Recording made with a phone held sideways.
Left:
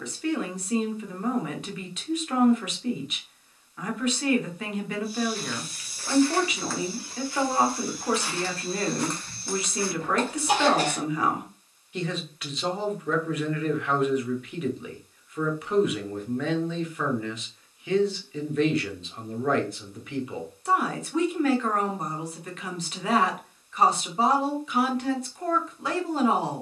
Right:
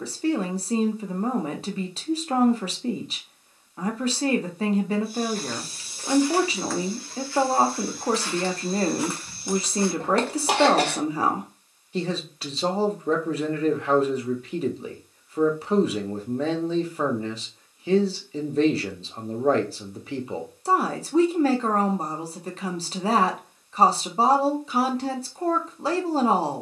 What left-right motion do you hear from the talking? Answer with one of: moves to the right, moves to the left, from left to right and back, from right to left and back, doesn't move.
doesn't move.